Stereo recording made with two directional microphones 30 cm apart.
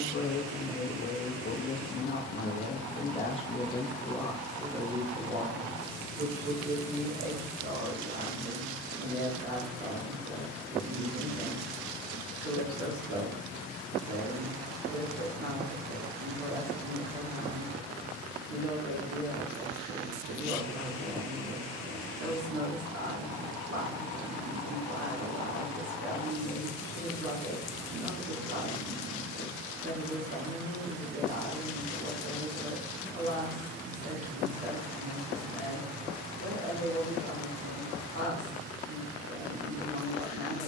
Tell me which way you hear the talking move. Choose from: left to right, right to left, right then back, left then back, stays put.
left to right.